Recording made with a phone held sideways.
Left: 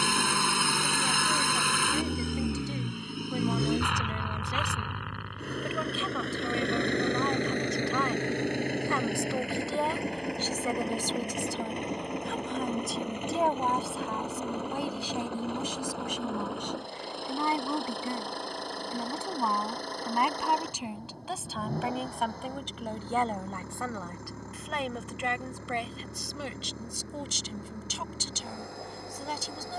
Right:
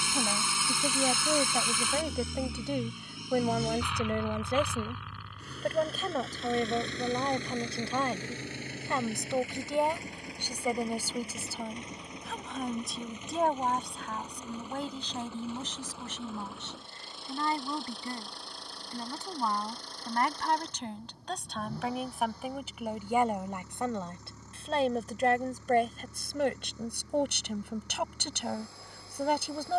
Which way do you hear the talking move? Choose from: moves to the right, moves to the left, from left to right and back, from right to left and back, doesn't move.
from right to left and back.